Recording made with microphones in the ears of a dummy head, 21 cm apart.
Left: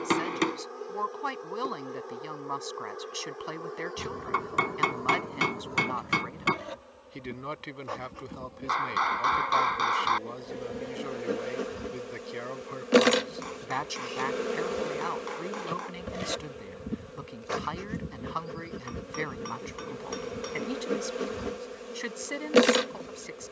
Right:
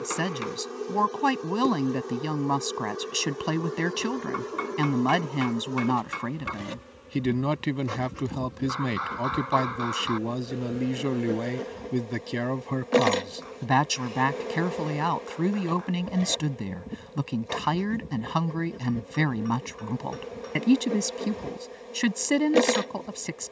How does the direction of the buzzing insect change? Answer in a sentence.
In this clip you hear the buzzing insect go from the right side to the left.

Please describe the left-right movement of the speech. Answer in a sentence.
You can hear the speech stay put.